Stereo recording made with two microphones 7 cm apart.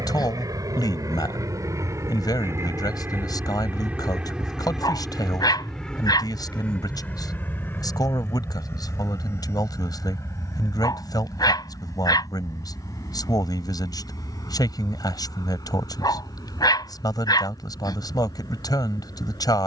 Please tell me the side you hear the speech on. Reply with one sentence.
You can hear the speech on the left.